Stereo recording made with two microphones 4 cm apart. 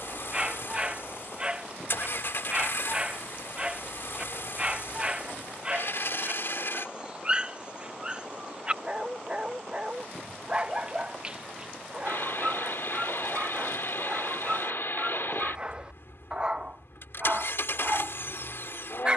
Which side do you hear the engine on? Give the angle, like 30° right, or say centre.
70° left.